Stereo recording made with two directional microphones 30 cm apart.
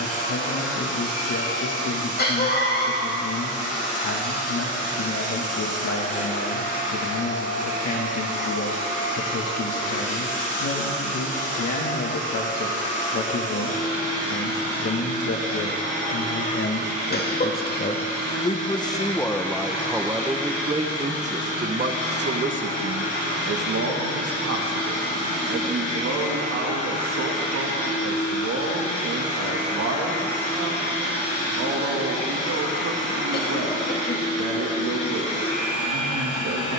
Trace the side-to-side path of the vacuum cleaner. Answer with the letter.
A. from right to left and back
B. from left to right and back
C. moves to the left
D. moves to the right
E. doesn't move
E.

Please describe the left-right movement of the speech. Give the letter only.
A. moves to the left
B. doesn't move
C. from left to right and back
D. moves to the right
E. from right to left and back
D.